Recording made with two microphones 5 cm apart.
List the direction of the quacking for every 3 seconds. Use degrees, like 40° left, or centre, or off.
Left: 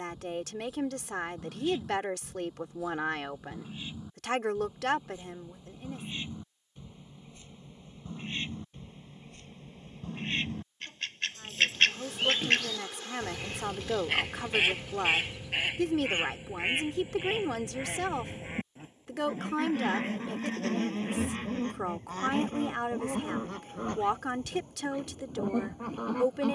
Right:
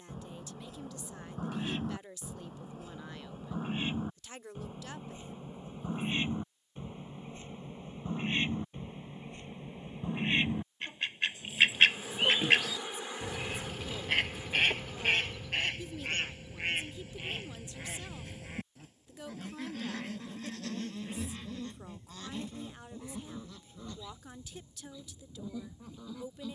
40° right, 40° right, 30° right, 20° right, centre, 20° left, 30° left, 50° left, 60° left.